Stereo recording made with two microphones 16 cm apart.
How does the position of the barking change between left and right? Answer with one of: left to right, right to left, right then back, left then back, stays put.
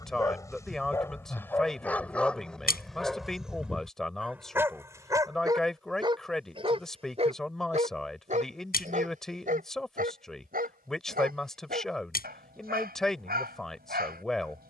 left to right.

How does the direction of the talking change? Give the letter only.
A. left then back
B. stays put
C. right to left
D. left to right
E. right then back
B.